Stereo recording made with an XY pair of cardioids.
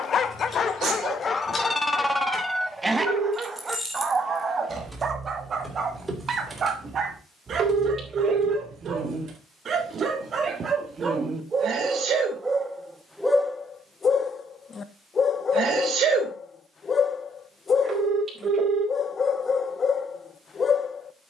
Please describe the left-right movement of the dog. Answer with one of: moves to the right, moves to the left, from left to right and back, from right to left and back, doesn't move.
from left to right and back.